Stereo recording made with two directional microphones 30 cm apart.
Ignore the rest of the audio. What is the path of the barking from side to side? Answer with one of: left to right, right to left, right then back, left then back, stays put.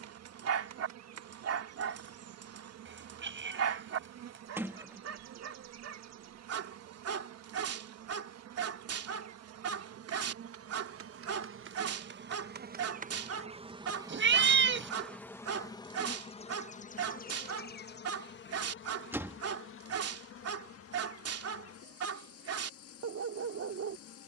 stays put.